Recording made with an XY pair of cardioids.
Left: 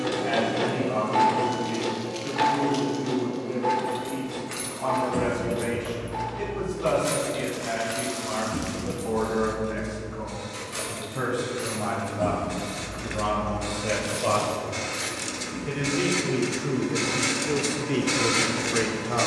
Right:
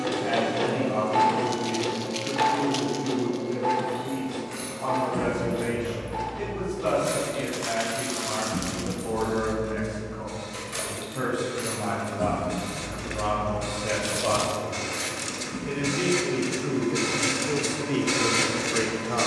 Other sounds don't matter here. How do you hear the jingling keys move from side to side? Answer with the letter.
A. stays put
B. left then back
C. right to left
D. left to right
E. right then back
D.